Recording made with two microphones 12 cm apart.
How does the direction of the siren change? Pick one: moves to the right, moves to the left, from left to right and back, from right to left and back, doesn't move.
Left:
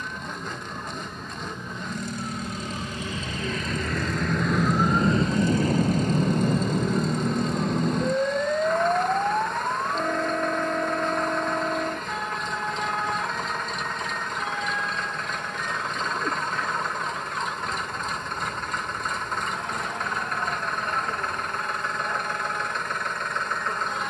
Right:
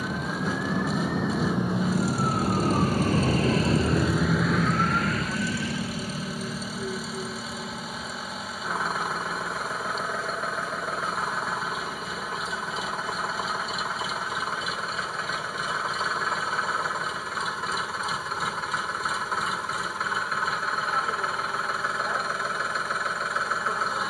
moves to the left.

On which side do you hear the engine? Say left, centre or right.
centre.